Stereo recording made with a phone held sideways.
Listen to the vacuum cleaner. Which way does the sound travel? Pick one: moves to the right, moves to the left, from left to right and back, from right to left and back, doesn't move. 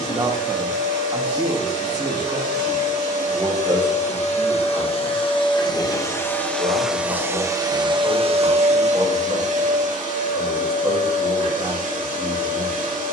moves to the right.